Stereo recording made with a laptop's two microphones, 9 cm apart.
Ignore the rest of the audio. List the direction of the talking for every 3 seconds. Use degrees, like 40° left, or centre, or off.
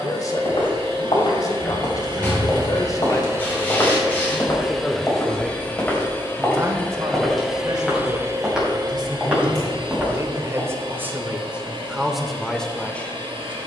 40° left, 10° left, 40° right, 30° right, 10° left.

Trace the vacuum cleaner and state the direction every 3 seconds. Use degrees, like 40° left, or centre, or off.
60° right, 10° right, 10° right, 60° right, 60° right.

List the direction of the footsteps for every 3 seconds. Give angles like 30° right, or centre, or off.
60° left, 30° left, centre, 10° right, off.